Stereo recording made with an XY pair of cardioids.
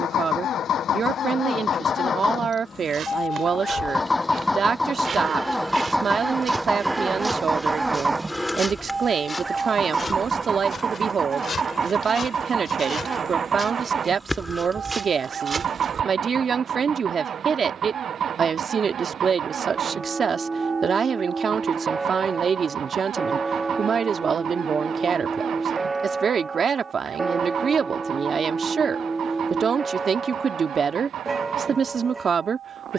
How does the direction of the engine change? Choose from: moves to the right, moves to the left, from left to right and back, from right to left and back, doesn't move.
moves to the right.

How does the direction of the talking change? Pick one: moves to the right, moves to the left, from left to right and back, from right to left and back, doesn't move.
doesn't move.